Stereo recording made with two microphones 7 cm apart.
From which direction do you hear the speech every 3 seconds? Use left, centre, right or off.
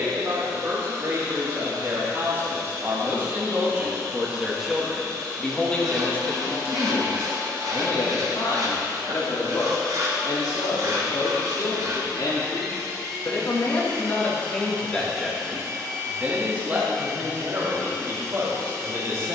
right, centre, left, left, left, right, right.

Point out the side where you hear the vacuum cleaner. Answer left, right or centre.
right.